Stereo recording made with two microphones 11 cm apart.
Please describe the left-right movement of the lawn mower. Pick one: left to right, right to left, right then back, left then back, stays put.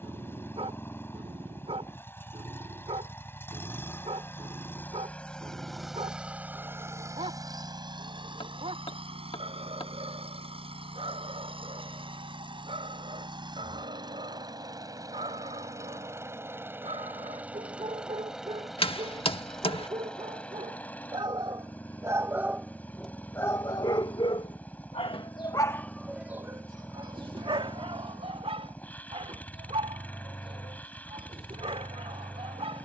right then back.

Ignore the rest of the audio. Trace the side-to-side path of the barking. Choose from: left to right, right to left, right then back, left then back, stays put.
left then back.